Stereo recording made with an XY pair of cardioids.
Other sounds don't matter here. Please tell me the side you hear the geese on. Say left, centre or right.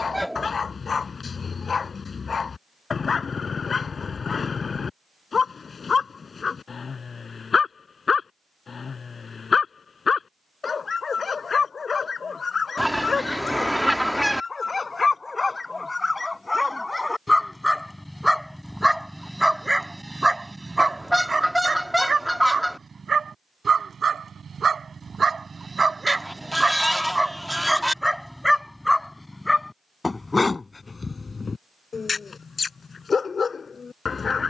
centre.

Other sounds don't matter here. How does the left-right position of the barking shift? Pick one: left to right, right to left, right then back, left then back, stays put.
right then back.